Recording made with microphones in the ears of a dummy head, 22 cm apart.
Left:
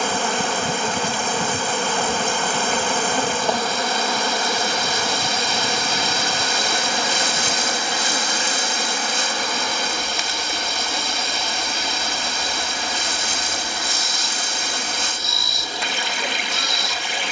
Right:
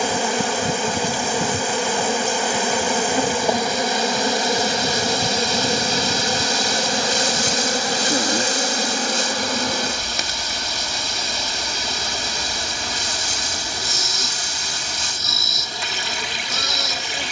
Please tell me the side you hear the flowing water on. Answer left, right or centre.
left.